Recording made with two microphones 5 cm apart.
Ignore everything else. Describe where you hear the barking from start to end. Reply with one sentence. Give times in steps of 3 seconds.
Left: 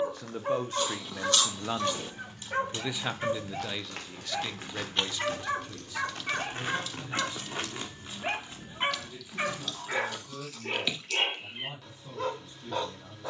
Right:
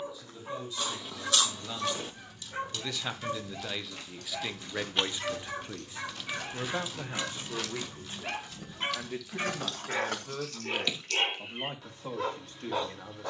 In this clip you hear the barking on the left from 0 s and in the centre from 9 s.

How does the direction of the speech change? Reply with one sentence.
You can hear the speech go from the left side to the right.